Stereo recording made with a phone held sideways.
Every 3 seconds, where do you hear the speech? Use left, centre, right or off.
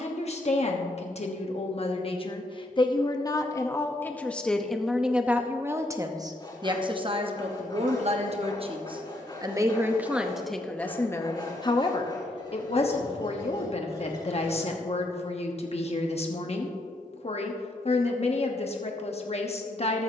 left, centre, right, centre, left, left, left.